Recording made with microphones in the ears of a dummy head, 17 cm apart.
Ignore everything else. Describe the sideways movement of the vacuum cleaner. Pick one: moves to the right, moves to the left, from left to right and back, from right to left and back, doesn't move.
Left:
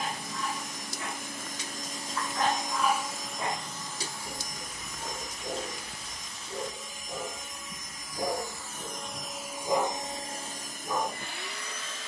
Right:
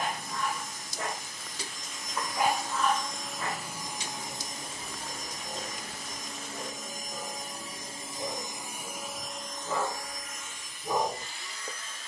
from left to right and back.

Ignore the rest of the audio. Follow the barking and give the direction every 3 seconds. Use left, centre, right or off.
right, left, left, centre.